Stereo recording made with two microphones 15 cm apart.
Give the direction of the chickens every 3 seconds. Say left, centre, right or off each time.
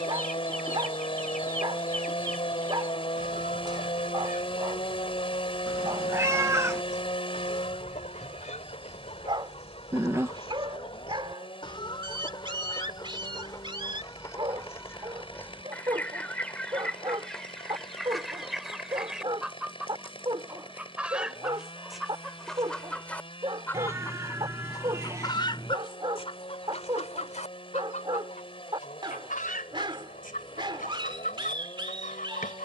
left, left, left, left, left, centre, centre, centre, left, left, left.